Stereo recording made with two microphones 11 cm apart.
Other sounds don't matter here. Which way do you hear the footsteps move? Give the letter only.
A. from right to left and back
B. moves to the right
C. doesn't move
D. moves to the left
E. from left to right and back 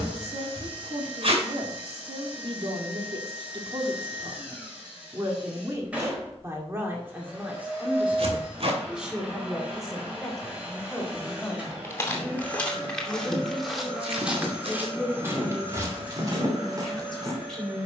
B.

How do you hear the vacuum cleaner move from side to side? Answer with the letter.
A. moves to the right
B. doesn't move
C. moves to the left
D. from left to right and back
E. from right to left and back
B.